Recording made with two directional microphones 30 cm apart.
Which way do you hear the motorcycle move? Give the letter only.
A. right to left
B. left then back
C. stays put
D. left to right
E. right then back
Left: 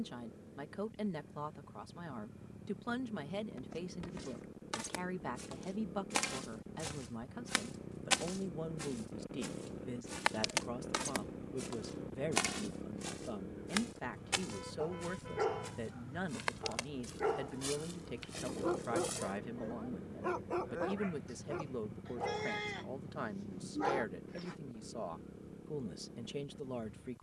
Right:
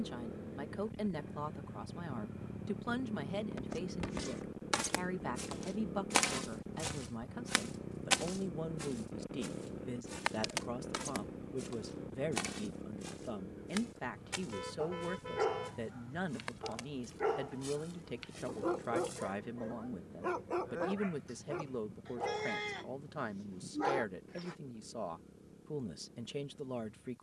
A.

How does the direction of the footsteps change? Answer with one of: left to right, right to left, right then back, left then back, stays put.
right to left.